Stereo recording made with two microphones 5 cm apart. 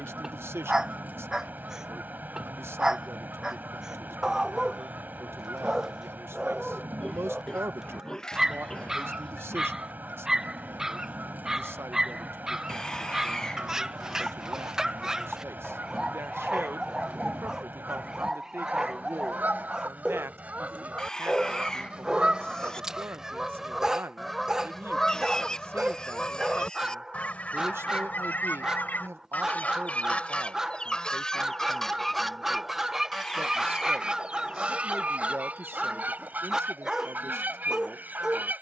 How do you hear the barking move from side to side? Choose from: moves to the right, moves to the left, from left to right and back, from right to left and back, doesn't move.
doesn't move.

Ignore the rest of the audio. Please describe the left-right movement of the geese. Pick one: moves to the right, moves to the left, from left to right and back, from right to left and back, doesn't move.
from right to left and back.